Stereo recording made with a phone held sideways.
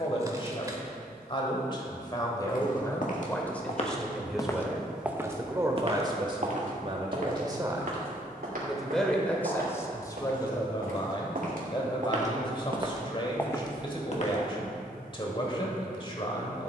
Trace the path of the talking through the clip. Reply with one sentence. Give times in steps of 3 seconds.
In this clip you hear the talking on the left from 0 s, in the centre from 3 s, on the right from 6 s and on the left from 9 s.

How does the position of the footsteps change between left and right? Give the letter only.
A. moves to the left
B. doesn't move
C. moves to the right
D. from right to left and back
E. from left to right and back
E.